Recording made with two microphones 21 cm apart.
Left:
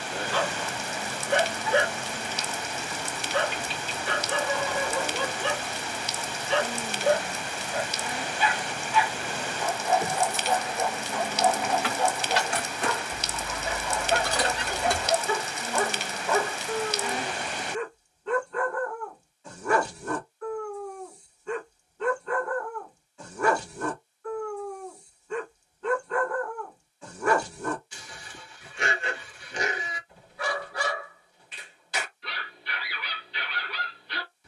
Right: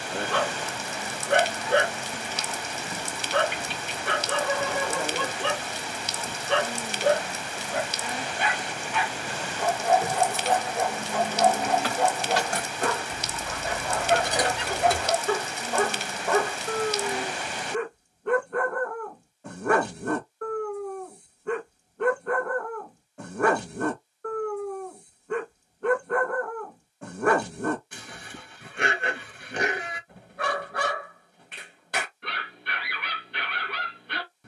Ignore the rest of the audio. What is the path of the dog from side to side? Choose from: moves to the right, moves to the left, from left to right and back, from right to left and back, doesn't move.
doesn't move.